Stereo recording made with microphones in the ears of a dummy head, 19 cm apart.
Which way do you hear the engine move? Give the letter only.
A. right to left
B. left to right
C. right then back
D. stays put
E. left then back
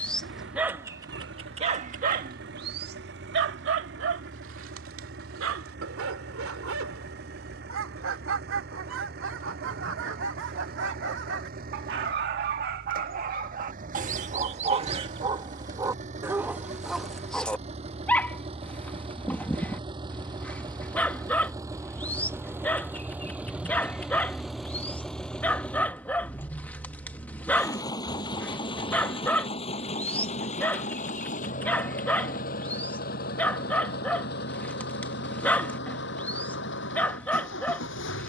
A.